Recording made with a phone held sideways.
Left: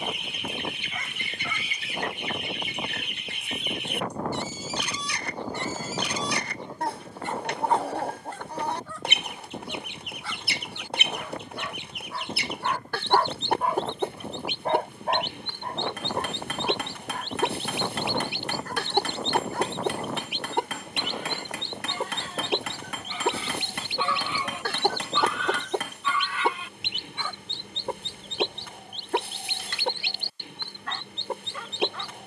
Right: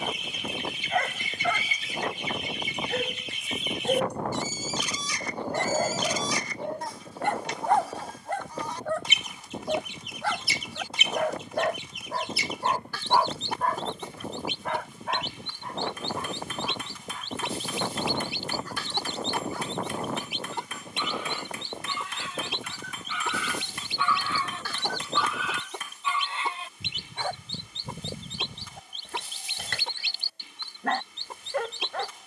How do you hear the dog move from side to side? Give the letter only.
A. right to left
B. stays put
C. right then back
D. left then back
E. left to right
D.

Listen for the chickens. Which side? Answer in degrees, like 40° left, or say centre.
60° left.